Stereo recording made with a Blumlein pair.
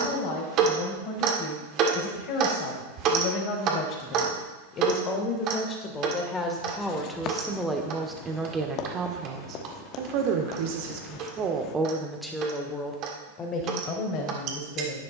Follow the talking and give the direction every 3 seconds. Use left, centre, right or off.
left, left, centre, right, left.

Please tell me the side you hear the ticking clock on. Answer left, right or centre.
right.